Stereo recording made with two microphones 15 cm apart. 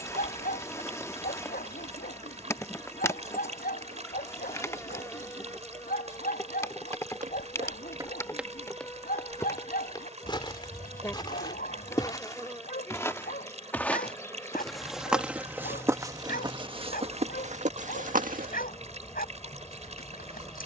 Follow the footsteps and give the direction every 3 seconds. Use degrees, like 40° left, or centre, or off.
off, off, 40° right, 30° left, 10° left, 30° right, 60° right.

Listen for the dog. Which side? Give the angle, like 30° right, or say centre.
70° left.